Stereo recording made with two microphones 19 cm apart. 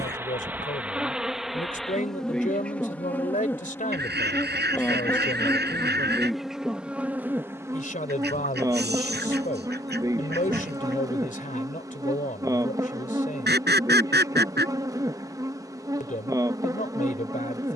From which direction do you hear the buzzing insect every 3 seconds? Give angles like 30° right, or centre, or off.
centre, 10° left, 10° right, 20° right, 20° right, 20° right.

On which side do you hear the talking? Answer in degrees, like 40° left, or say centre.
40° left.